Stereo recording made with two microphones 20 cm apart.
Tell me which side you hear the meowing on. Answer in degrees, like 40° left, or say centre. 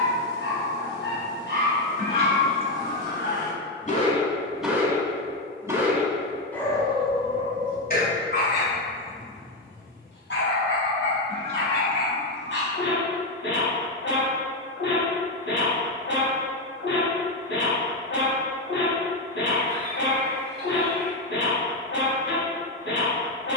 50° right.